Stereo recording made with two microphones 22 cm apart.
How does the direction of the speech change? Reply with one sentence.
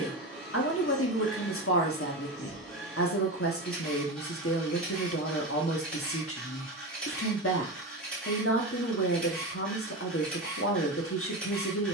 You can hear the speech stay put.